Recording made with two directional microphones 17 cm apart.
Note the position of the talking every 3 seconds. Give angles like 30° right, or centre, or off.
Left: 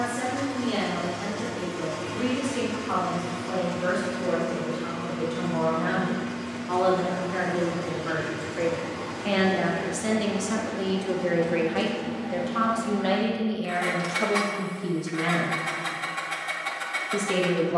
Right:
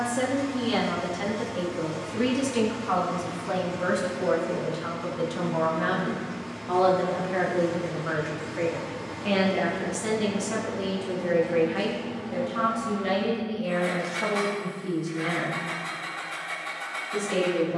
50° right, 40° right, 20° right, 10° left, 30° left, 50° left.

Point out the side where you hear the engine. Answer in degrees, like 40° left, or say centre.
40° left.